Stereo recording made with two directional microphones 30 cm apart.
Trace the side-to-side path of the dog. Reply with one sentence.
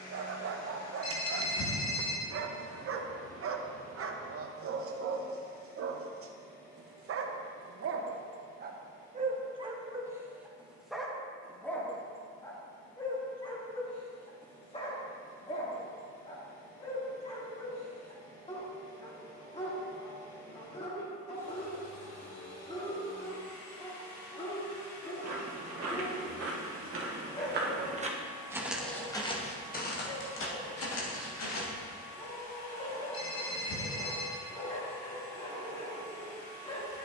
In this clip you hear the dog travel towards the left.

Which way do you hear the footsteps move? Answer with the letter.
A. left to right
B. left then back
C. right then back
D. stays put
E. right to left
E.